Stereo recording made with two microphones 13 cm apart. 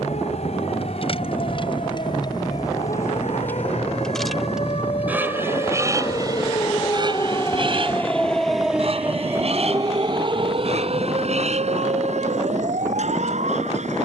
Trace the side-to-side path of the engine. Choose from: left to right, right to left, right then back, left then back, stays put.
left to right.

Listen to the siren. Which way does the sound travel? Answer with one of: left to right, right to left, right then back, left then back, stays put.
left to right.